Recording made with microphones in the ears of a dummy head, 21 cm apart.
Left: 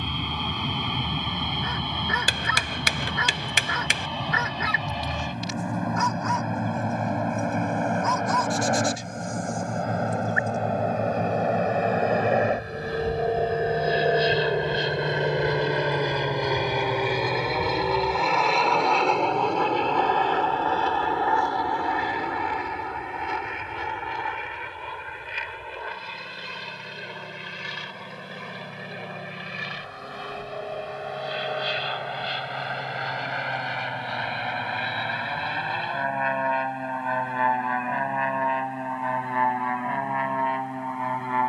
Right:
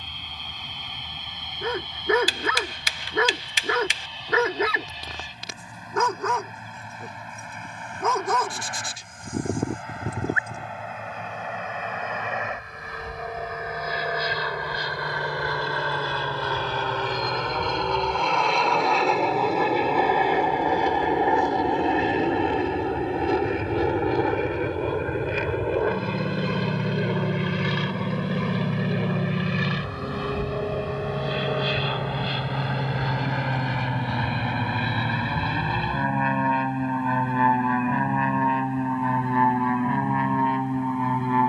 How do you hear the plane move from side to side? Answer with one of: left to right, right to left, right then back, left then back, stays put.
left to right.